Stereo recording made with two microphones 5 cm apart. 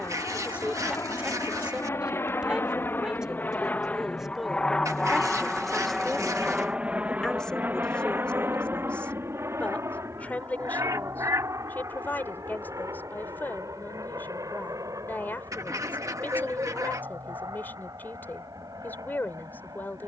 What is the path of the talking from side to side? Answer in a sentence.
In this clip you hear the talking move to the left.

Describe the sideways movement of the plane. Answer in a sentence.
In this clip you hear the plane go from the left side to the right.